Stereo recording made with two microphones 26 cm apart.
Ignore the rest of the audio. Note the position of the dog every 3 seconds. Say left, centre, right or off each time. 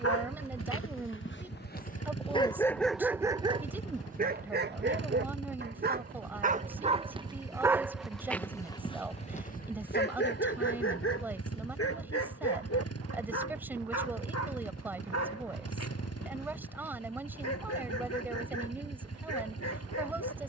left, right, centre, left, left, left, left.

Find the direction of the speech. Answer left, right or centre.
centre.